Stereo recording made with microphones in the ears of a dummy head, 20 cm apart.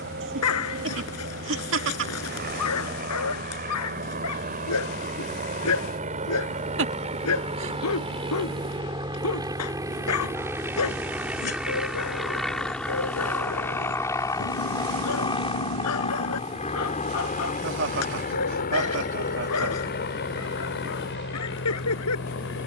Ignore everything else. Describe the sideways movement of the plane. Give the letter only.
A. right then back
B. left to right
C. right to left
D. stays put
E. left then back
C.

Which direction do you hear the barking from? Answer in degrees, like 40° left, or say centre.
80° left.